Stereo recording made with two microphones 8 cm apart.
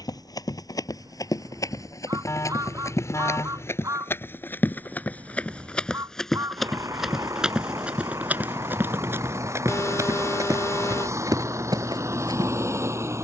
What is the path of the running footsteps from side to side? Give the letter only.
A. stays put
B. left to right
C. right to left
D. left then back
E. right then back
B.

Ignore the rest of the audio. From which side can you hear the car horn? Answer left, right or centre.
left.